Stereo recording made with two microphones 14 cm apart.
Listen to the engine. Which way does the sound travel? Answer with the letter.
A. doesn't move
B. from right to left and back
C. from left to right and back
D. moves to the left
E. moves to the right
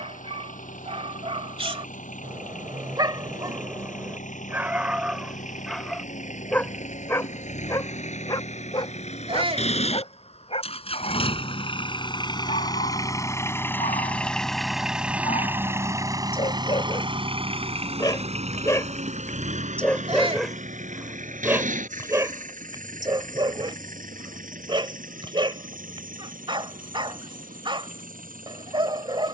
E.